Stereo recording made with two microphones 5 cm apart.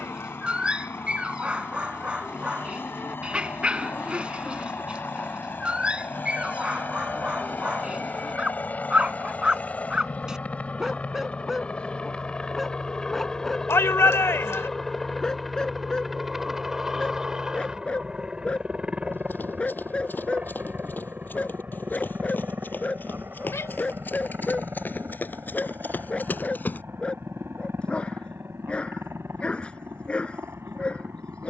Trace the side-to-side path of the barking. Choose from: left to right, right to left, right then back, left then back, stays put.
right to left.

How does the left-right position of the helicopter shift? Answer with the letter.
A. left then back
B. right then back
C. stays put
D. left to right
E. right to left
D.